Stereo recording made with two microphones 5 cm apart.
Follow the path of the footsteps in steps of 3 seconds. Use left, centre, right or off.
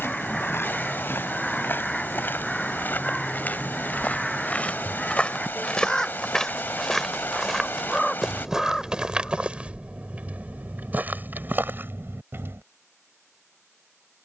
left, left, centre, right, right.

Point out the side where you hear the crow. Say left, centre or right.
centre.